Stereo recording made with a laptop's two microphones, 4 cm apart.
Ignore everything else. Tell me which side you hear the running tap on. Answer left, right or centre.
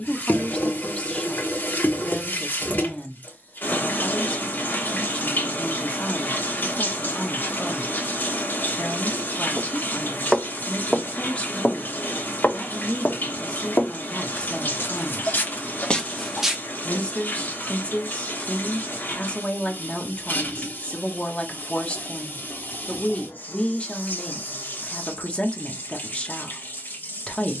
left.